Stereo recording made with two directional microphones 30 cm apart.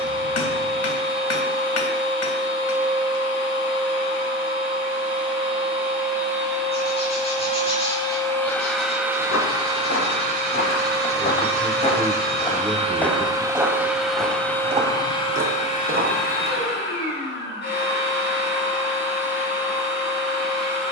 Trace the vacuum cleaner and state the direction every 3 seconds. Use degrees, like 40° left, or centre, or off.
40° left, 40° left, 20° left, 30° right, 10° right, 30° left, 40° left.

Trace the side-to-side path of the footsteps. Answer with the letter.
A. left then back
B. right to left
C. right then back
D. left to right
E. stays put
D.